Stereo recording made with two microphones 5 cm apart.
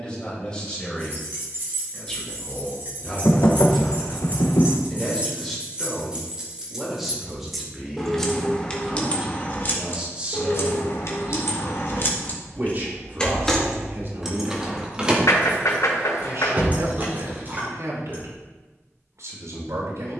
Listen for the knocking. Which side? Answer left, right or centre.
left.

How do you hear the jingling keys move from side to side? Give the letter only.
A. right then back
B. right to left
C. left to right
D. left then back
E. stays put
D.